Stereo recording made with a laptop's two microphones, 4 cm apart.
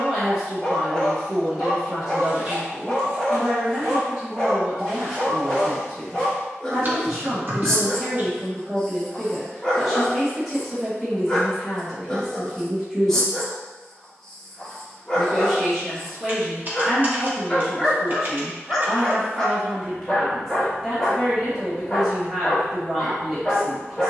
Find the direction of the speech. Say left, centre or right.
centre.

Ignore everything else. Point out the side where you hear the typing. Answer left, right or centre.
right.